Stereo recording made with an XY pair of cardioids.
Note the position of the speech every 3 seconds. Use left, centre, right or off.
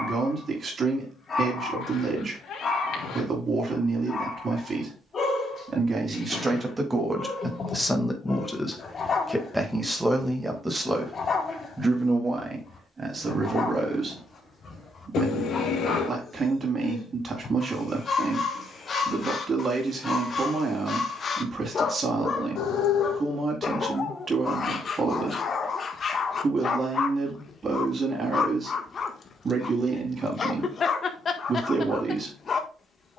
right, right, centre, centre, right, right, right, right, right, right, right.